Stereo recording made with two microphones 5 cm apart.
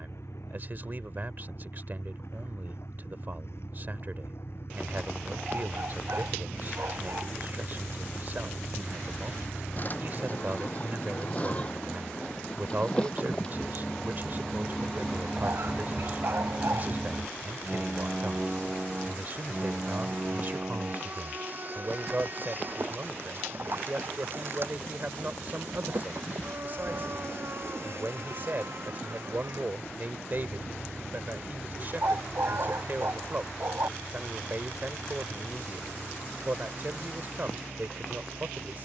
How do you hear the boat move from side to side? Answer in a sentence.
You can hear the boat go from the left side to the right.